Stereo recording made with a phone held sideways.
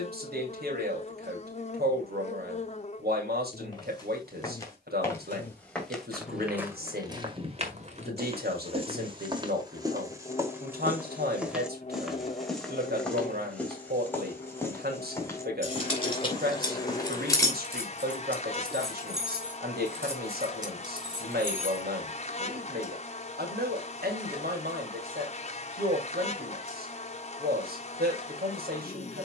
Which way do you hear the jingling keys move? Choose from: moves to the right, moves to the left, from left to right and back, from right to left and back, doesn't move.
moves to the right.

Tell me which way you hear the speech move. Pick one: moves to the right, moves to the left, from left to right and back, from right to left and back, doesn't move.
doesn't move.